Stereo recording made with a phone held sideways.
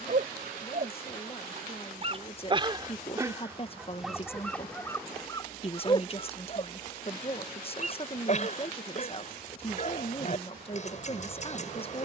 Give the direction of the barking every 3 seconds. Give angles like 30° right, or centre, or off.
40° right, 10° left, 40° left, 50° left.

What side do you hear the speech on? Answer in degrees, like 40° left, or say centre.
40° left.